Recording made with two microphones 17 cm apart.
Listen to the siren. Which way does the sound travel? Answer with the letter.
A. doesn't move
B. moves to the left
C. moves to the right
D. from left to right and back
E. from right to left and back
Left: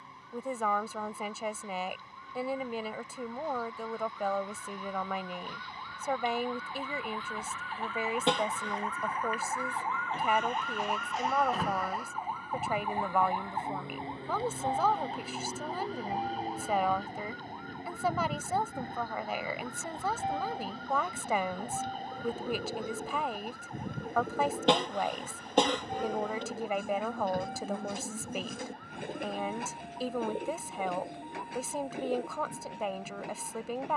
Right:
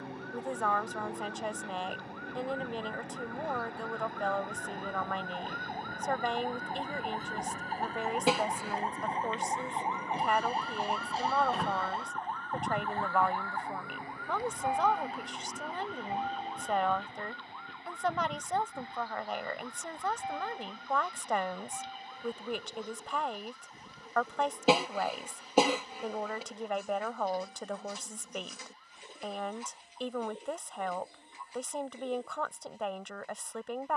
B.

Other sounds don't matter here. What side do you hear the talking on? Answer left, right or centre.
centre.